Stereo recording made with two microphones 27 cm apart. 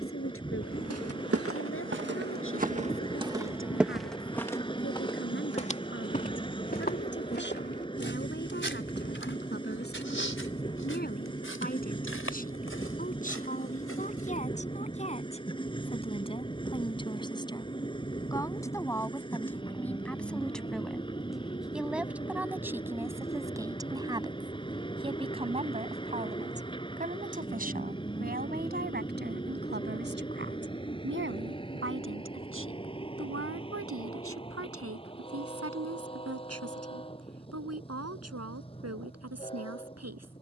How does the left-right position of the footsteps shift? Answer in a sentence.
You can hear the footsteps travel towards the left.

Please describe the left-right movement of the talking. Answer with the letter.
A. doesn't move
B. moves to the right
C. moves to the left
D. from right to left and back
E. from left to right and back
B.